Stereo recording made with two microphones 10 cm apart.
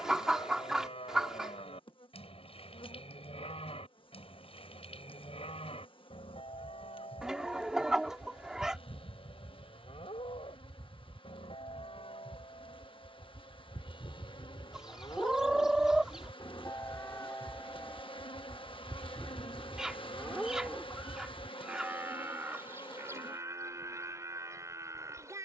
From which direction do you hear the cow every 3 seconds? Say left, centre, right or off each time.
left, left, left, left, left, left, centre, right, right.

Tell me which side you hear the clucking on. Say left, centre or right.
centre.